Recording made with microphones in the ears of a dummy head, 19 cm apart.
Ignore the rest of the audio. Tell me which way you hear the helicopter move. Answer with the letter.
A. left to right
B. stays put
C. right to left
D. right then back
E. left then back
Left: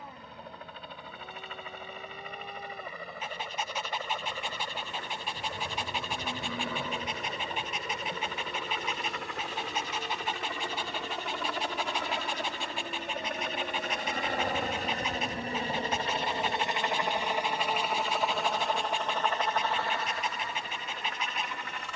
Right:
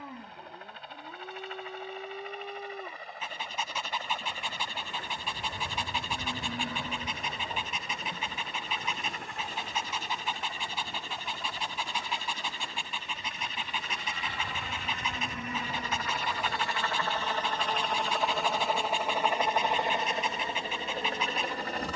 A.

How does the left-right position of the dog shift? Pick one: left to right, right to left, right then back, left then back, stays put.
stays put.